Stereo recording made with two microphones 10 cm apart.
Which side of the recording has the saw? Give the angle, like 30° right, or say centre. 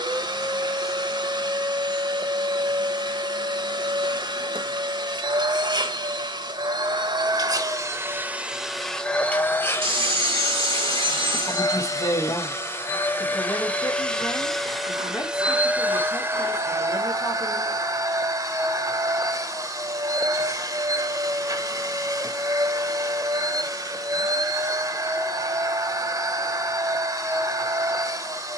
60° right.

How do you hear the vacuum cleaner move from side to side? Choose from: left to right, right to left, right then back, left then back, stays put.
left then back.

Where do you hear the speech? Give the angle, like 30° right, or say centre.
40° left.